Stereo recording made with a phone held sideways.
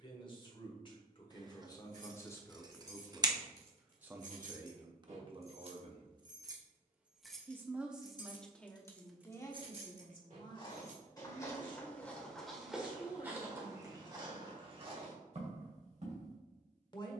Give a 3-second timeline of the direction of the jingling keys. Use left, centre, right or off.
right, right, centre, right, off, off.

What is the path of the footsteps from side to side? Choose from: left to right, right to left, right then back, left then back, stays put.
left to right.